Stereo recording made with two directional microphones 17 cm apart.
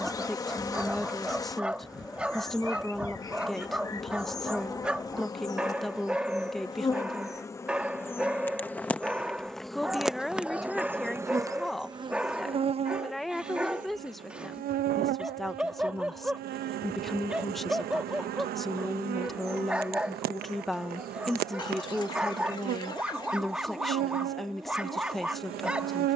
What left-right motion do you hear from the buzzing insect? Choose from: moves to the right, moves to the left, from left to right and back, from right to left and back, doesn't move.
moves to the right.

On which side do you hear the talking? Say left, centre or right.
centre.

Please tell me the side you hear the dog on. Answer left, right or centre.
centre.